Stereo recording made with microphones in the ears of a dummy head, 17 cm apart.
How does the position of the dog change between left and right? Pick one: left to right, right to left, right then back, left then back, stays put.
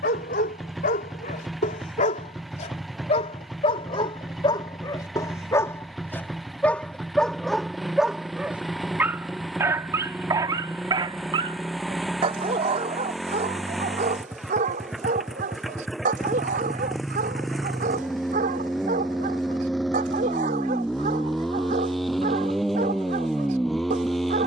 left to right.